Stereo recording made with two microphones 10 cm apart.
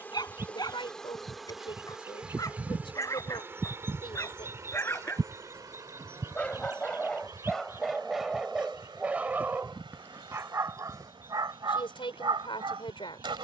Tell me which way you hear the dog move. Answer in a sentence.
In this clip you hear the dog go from the left side to the right.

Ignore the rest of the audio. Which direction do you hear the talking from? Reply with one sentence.
You can hear the talking on the left.